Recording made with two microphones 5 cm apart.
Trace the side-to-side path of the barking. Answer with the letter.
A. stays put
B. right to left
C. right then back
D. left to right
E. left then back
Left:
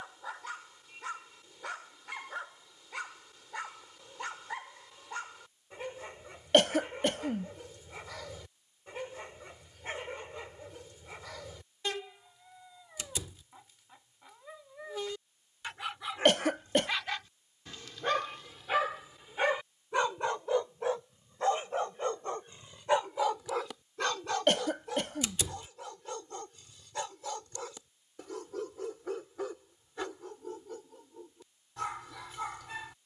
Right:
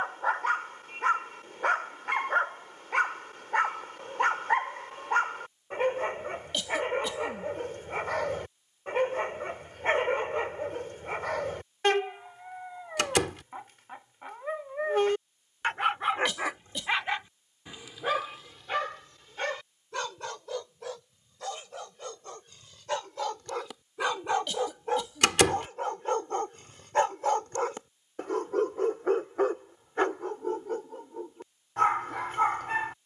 E.